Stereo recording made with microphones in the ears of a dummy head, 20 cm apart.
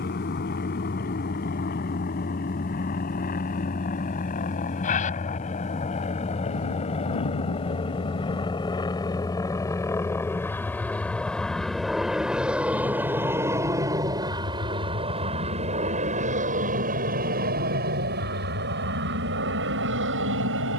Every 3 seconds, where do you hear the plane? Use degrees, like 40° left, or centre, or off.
50° left, 40° left, 30° left, 10° left, 10° right, 30° right, 50° right.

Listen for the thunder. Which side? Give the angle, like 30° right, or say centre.
80° left.